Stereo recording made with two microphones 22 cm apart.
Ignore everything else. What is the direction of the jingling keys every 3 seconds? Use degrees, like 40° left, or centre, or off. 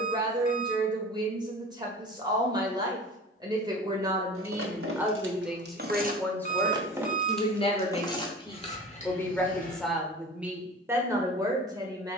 off, 60° right, centre, 40° left.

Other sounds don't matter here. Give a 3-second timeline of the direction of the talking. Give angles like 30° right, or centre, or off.
20° right, 10° right, 20° left, 10° right.